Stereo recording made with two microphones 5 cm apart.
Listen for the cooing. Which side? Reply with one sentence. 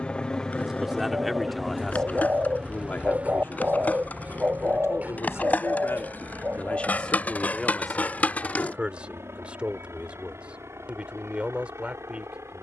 In this clip you hear the cooing on the right.